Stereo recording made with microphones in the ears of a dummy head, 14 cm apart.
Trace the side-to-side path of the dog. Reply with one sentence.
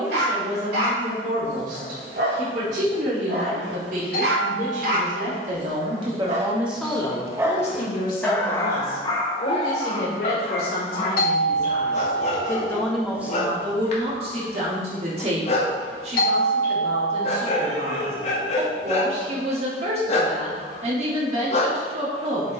In this clip you hear the dog move to the left.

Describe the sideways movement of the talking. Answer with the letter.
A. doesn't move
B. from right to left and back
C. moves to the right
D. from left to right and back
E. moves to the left
B.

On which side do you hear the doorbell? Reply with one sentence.
You can hear the doorbell on the left.